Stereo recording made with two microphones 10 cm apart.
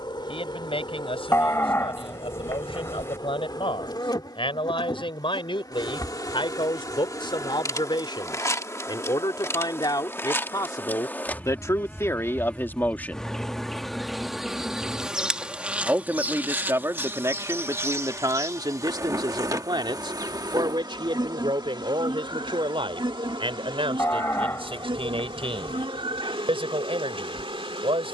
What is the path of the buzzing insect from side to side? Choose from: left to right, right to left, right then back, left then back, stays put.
left to right.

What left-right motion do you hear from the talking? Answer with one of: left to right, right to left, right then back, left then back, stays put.
left to right.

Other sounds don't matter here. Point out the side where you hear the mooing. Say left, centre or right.
left.